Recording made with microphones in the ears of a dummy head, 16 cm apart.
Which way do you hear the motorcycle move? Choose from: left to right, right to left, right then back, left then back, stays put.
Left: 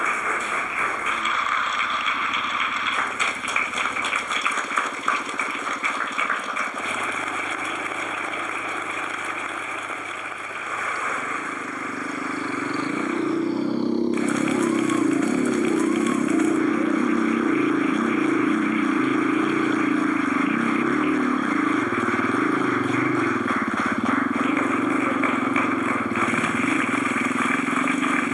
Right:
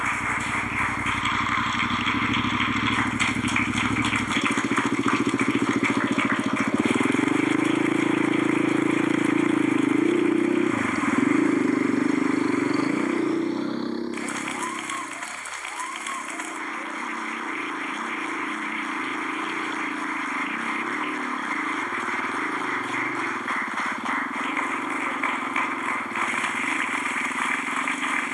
right to left.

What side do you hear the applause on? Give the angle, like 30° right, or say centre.
60° left.